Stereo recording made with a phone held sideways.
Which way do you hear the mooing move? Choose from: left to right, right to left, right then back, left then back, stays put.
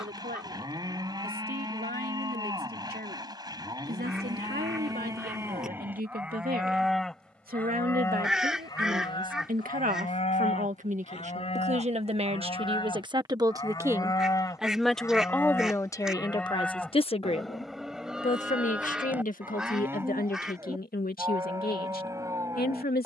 left then back.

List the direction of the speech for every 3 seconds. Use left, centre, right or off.
right, right, right, right, right, left, left, left.